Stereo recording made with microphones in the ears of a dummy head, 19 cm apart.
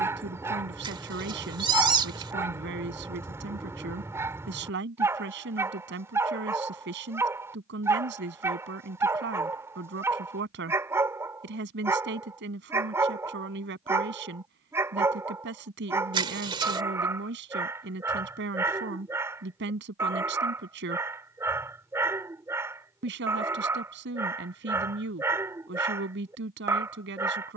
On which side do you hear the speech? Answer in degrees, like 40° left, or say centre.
60° right.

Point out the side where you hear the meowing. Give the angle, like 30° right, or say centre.
20° right.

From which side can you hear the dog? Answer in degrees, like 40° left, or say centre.
10° right.